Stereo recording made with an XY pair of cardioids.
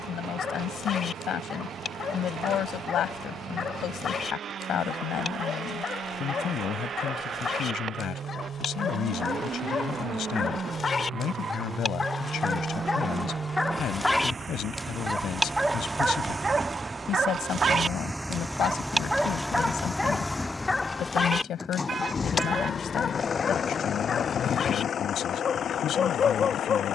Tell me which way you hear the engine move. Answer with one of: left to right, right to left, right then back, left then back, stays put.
right to left.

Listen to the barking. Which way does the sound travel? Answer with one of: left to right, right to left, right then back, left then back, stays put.
right then back.